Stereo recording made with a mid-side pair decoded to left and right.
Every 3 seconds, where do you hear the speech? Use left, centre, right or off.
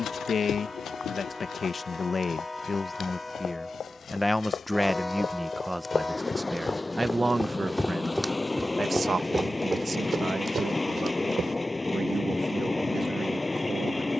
left, centre, right, right, right.